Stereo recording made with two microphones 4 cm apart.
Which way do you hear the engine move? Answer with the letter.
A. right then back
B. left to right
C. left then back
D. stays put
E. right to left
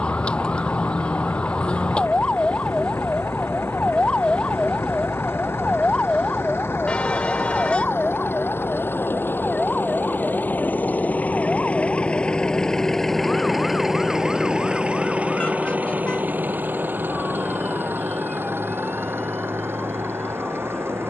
B.